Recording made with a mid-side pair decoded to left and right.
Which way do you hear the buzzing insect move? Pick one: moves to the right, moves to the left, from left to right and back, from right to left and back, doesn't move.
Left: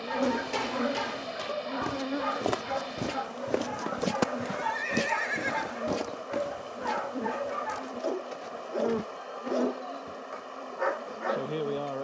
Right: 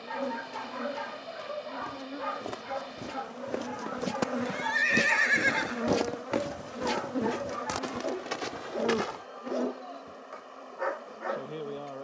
from left to right and back.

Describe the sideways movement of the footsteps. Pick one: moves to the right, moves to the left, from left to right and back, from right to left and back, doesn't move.
moves to the right.